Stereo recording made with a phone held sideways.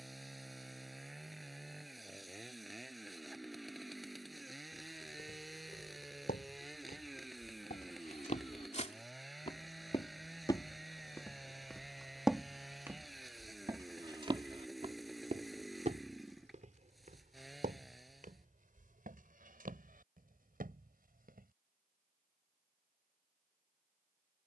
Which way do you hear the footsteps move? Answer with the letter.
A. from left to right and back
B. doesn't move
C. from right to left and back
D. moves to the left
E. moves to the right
E.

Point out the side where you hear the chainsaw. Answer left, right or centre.
centre.